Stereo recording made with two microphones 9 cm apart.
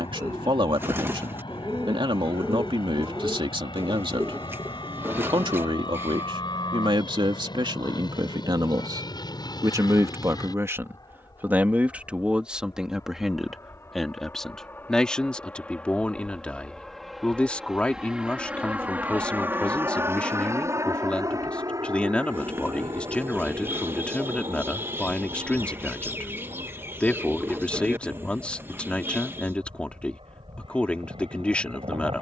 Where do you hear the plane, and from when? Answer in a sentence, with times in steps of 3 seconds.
In this clip you hear the plane on the left from 0 s, in the centre from 15 s and on the right from 18 s.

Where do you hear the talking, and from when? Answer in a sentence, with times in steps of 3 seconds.
You can hear the talking on the right from 0 s and in the centre from 12 s.